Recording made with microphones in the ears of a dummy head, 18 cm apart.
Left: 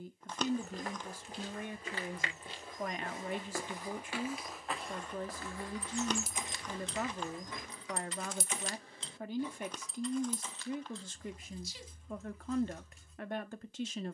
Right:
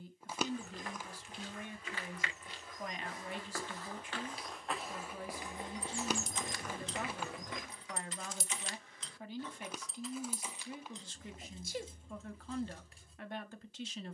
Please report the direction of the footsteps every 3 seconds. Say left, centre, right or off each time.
left, centre, right, off, off.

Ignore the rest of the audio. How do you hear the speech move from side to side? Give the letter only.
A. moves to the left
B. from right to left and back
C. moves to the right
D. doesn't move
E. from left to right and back
D.